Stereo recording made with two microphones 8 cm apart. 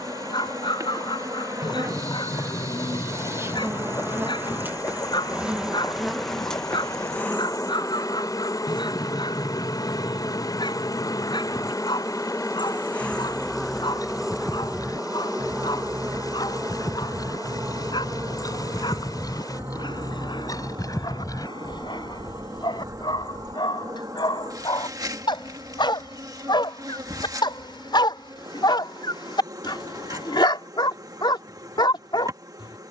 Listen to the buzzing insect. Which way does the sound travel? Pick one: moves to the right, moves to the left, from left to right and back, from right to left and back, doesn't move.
from right to left and back.